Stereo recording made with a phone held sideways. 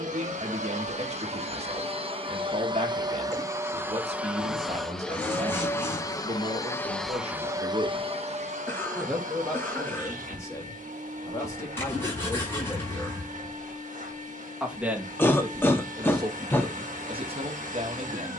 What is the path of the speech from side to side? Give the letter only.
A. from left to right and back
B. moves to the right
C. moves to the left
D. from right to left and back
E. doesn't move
D.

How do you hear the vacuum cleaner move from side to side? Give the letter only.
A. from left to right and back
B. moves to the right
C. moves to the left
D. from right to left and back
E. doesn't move
D.